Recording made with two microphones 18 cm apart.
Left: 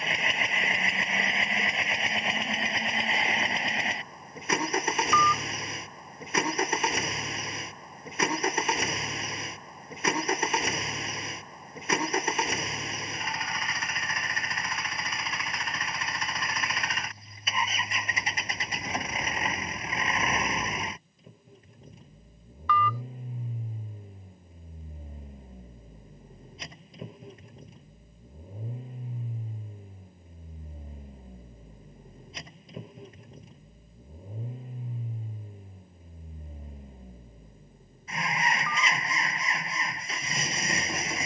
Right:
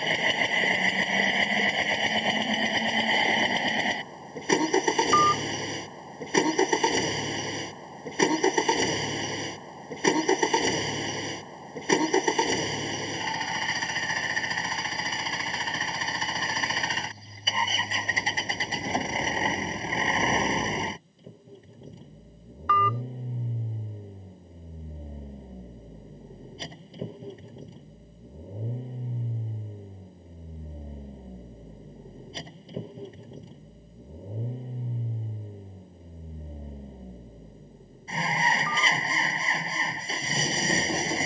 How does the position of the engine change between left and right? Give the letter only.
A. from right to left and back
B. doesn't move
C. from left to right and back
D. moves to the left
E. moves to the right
B.